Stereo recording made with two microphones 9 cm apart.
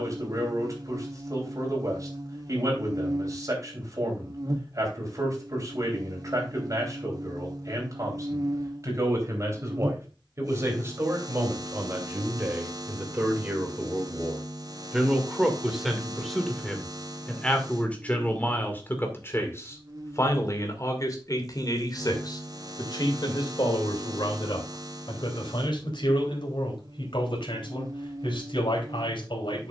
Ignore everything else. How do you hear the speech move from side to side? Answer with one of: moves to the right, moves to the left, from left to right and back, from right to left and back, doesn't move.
moves to the left.